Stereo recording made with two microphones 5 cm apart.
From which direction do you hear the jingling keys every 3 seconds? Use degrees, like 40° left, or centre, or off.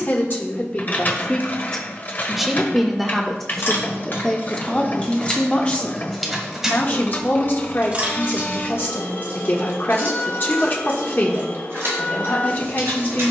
off, 30° left, 20° right, 50° right, 60° right.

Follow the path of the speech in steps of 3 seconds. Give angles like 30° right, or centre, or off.
20° left, 10° left, 40° left, 40° left, 40° left.